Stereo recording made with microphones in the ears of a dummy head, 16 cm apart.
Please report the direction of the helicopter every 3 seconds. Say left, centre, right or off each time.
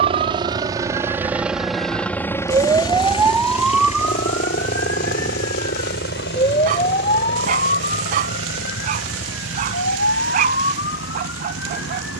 centre, left, left, left.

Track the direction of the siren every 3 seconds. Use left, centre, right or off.
right, centre, left, left.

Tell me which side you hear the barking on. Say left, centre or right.
right.